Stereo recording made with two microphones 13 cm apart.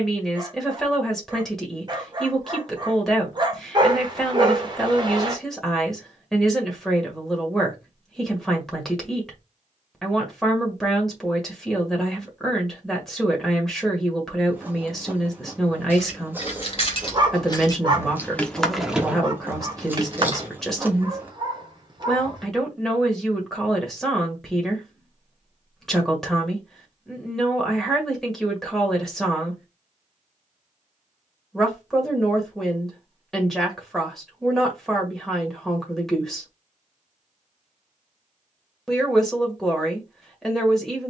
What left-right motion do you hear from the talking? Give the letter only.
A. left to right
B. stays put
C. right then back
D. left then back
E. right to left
B.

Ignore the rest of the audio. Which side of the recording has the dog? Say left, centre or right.
right.